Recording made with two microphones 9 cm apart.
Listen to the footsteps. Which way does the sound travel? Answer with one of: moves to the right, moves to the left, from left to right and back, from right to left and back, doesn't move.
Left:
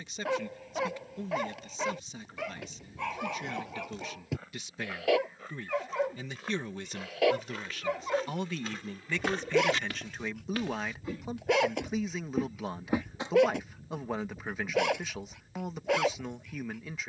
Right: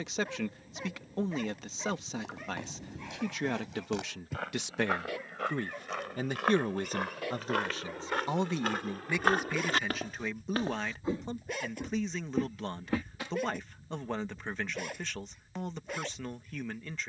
moves to the left.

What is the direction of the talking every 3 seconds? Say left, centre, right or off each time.
right, right, right, centre, centre, centre.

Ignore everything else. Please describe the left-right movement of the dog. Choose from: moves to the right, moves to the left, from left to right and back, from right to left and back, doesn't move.
doesn't move.